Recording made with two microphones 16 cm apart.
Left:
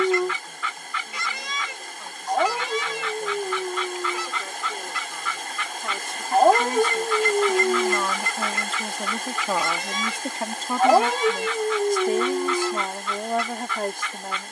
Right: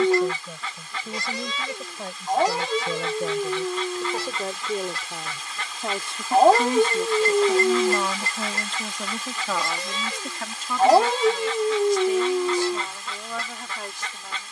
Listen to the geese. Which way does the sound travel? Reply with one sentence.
You can hear the geese stay in one place.